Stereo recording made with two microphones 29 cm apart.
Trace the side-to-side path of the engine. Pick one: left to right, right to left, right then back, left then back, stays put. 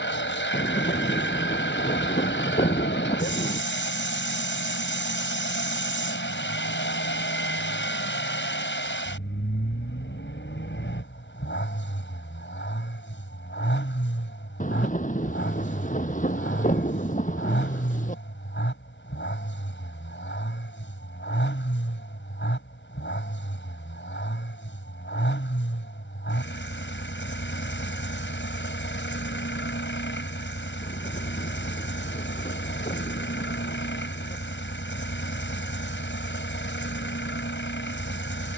stays put.